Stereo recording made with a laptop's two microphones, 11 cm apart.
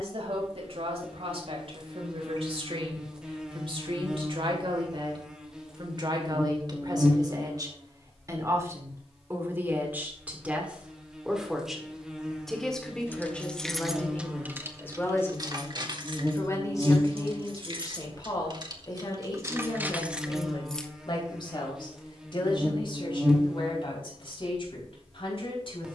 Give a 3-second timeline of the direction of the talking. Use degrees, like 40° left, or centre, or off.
60° right, 50° right, 30° right, 10° right, 10° left, 30° left, 40° left, 50° left, 50° left.